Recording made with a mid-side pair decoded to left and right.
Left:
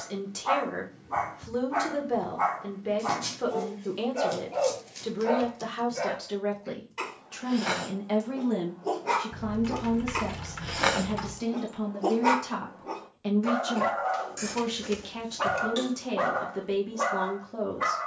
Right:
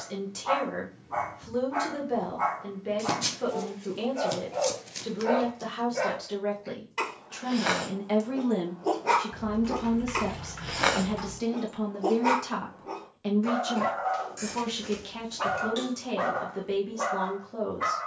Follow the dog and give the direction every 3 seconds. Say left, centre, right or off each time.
left, left, right, centre, left, left.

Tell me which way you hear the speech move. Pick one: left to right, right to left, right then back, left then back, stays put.
right then back.